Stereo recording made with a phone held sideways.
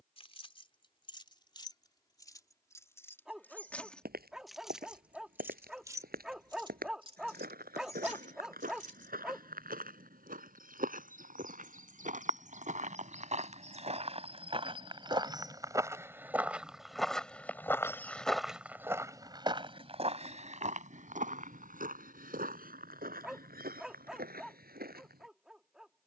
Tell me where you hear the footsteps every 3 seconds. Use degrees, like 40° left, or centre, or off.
off, 70° right, 70° right, 60° right, 50° right, 10° right, 30° right, 60° right, 70° right.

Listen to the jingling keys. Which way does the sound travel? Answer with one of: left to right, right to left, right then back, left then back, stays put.
left to right.